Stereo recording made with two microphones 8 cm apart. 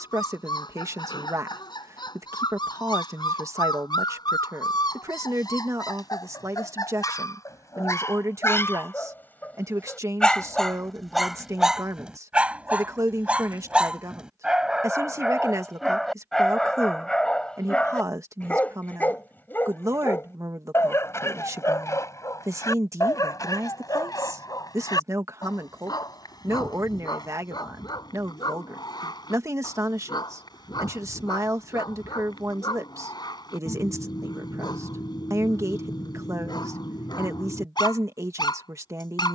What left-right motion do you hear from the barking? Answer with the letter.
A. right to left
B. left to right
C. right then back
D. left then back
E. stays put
C.